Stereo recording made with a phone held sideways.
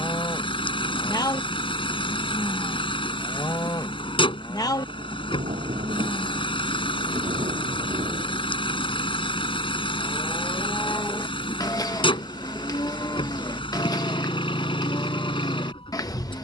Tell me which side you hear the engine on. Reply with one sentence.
In this clip you hear the engine on the left.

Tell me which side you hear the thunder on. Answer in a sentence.
In this clip you hear the thunder on the right.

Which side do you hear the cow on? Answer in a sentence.
In this clip you hear the cow on the left.